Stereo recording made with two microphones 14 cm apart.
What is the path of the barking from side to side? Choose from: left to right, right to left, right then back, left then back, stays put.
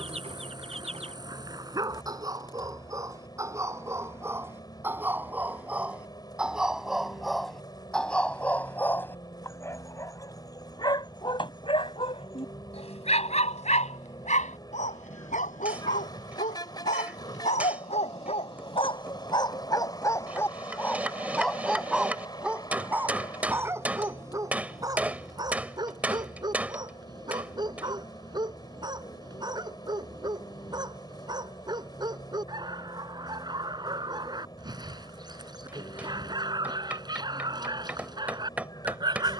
left then back.